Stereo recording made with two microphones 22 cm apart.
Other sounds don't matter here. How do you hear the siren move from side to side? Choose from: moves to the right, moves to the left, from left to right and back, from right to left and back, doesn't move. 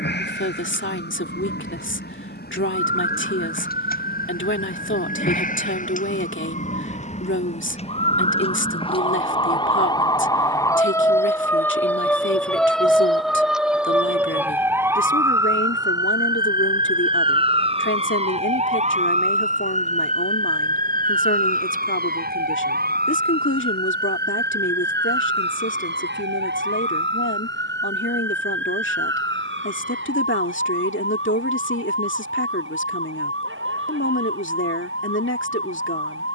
moves to the right.